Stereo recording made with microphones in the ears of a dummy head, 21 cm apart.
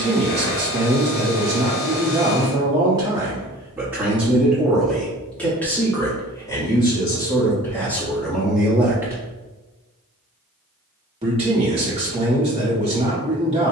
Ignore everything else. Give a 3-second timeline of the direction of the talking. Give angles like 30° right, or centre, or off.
30° right, centre, 10° left, 20° right, 20° right.